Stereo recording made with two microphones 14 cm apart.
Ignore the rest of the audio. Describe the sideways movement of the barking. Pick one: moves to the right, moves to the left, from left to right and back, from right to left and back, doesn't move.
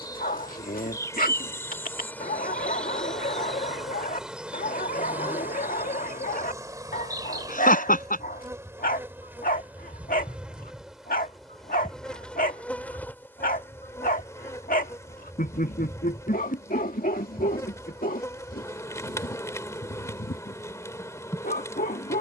doesn't move.